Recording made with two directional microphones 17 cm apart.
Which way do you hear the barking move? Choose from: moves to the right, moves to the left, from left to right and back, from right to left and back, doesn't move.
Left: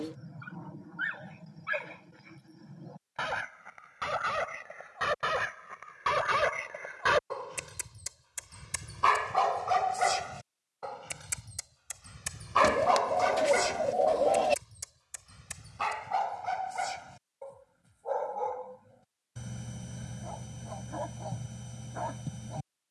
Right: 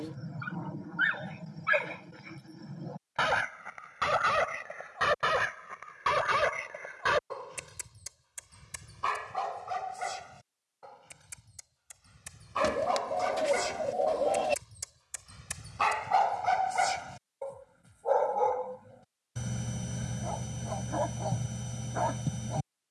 from right to left and back.